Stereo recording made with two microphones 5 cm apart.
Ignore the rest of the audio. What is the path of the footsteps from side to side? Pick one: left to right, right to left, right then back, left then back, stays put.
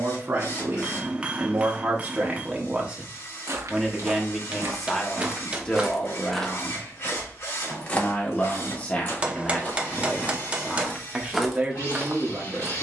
left then back.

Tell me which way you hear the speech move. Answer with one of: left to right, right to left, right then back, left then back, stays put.
left then back.